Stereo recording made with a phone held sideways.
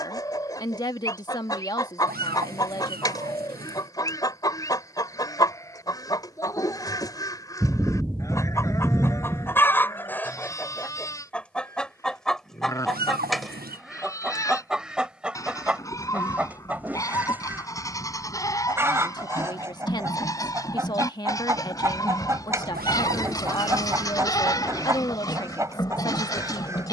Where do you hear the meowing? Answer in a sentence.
In this clip you hear the meowing on the right.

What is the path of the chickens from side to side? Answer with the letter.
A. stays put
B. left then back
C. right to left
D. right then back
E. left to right
E.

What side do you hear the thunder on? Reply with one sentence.
You can hear the thunder in the centre.